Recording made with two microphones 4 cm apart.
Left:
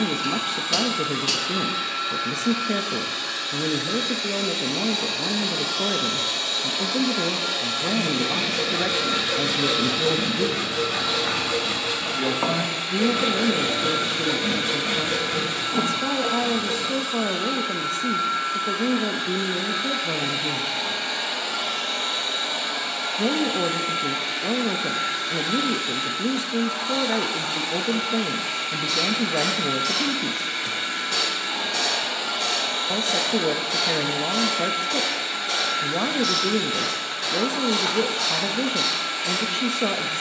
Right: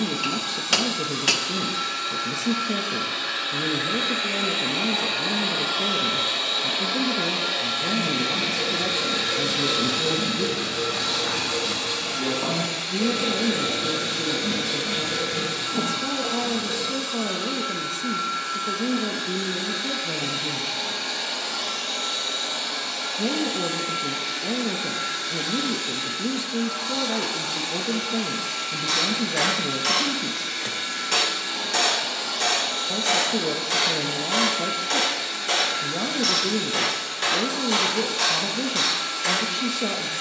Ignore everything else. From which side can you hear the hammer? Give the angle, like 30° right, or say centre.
70° right.